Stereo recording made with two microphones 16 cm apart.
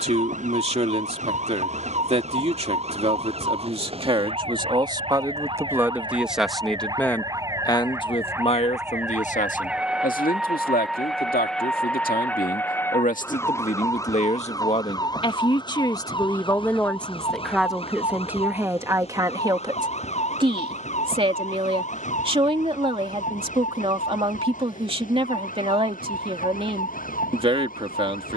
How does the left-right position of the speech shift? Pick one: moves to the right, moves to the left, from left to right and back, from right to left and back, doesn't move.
from right to left and back.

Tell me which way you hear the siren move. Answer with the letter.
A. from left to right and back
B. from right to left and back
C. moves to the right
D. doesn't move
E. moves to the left
E.